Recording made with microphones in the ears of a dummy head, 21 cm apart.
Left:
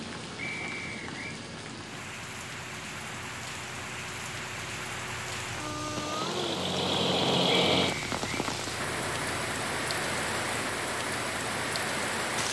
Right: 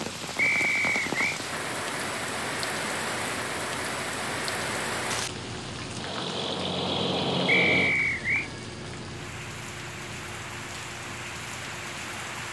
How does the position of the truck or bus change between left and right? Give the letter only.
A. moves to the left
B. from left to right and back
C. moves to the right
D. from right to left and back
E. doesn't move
A.